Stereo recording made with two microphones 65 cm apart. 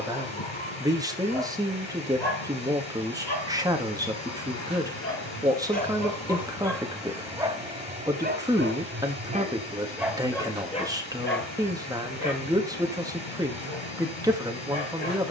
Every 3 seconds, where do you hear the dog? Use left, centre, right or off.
left, left, centre, centre, left.